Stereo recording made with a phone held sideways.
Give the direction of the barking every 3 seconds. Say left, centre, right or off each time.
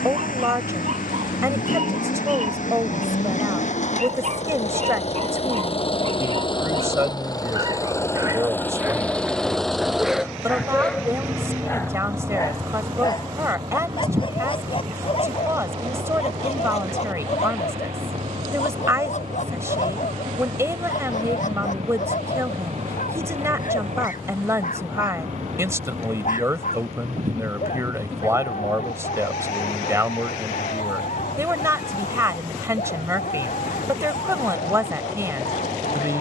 right, right, right, centre, left, left, left, left, left, left, left, left.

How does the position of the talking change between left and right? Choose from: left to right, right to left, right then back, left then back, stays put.
stays put.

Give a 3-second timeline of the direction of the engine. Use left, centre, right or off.
left, left, left, centre, right, right, right, right, right, right, right, right.